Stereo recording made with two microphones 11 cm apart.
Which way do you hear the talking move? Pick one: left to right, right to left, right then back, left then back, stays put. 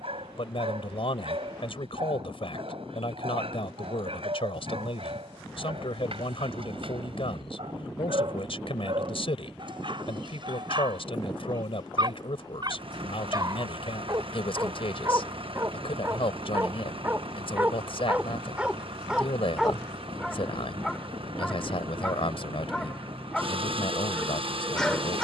stays put.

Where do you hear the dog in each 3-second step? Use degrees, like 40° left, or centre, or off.
70° right, 70° right, 60° right, 50° right, 40° right, 30° right, 10° right, 10° left, 10° left.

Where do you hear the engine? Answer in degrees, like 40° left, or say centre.
60° right.